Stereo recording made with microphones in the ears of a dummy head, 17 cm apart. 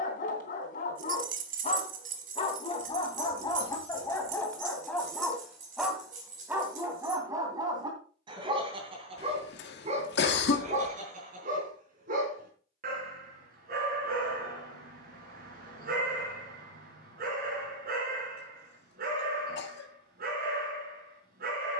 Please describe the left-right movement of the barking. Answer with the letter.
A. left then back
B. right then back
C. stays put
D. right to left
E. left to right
E.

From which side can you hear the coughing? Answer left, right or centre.
left.